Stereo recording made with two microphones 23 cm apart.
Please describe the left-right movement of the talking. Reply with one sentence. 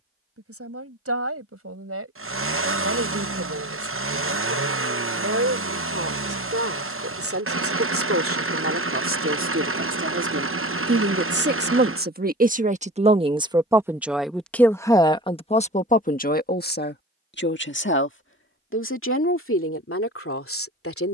You can hear the talking go from the right side to the left.